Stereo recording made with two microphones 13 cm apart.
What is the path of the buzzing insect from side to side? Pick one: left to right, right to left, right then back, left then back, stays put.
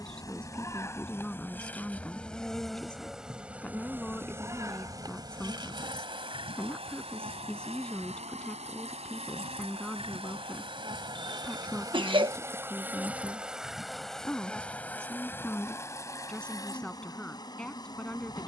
right then back.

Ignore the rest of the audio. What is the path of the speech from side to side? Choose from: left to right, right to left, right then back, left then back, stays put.
stays put.